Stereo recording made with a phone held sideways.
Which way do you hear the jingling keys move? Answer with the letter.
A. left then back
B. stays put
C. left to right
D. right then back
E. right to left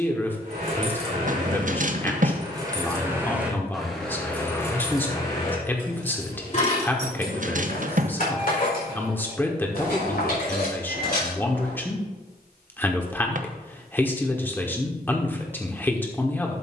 E.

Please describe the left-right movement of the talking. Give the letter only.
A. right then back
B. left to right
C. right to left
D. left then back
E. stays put
E.